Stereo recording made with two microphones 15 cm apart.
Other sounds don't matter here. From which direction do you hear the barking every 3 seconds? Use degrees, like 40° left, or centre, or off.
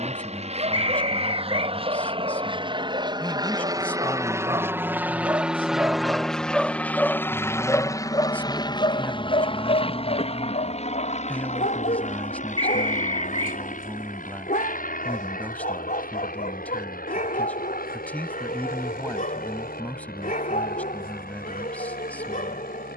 40° right, 30° right, 10° left, 60° left, 70° left, 70° left, 70° left, 70° left.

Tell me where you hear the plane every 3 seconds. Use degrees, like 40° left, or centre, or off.
40° right, 20° right, 20° left, 40° left, 60° left, 60° left, 70° left, 70° left.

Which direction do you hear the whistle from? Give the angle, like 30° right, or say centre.
30° right.